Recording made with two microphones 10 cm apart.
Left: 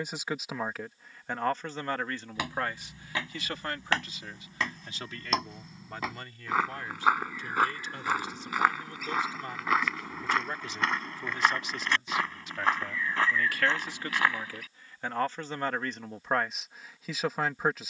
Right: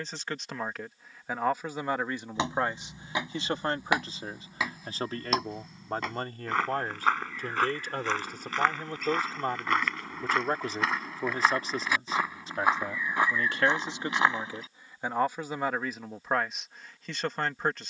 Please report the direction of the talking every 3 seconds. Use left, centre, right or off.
centre, right, right, right, right, centre.